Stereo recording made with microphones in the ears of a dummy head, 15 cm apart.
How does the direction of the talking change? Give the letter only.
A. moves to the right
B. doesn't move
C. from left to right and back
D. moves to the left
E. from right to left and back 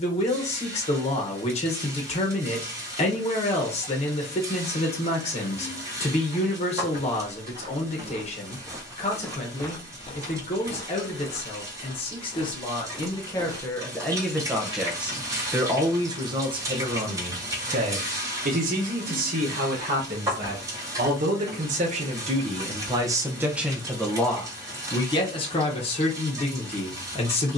C.